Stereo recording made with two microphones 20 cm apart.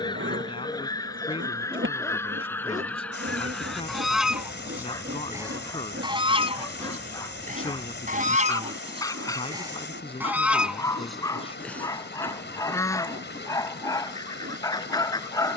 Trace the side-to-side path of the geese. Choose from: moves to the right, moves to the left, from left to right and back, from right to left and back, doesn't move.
from left to right and back.